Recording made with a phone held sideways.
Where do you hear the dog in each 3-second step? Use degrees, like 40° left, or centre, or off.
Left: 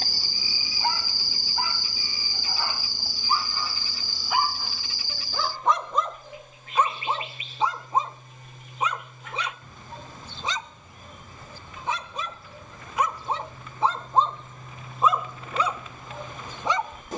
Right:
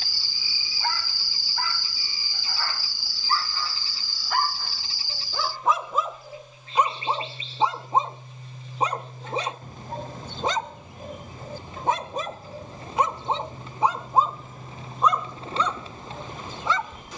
20° left, centre, 20° right, 50° right, 20° right, 10° left.